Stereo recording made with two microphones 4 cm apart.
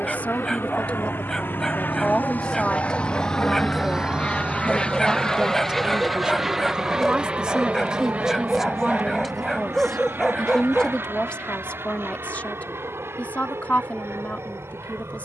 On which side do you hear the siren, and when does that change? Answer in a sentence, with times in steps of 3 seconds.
In this clip you hear the siren on the left from 0 s and on the right from 3 s.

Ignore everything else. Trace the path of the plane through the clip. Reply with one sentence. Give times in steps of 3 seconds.
You can hear the plane on the left from 0 s and on the right from 6 s.